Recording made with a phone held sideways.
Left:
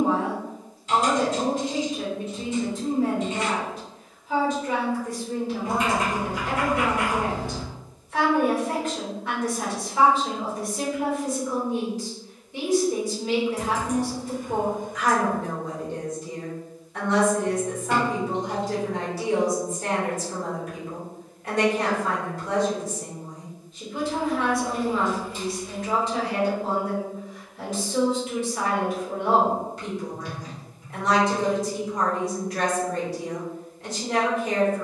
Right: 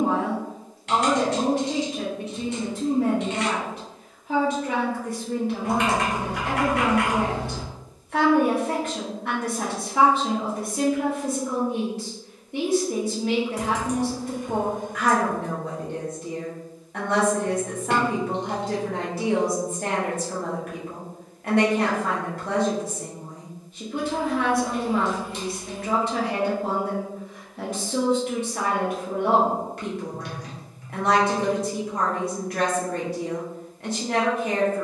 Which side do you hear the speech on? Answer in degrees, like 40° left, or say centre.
60° right.